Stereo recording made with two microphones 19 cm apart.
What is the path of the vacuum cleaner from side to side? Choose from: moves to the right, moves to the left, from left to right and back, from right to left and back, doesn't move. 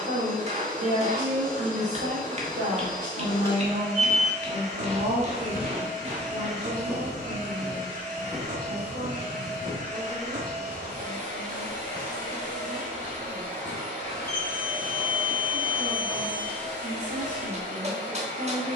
doesn't move.